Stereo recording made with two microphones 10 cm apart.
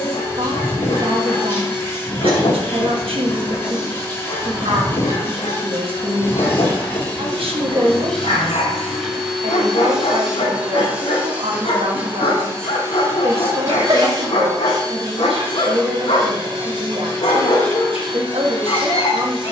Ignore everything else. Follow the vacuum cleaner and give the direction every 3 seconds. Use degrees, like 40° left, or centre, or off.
30° left, 30° left, 10° left, 10° right, 30° right, 50° right, 60° right.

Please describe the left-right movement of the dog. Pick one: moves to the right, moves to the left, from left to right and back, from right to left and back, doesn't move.
doesn't move.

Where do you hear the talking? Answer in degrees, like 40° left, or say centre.
70° right.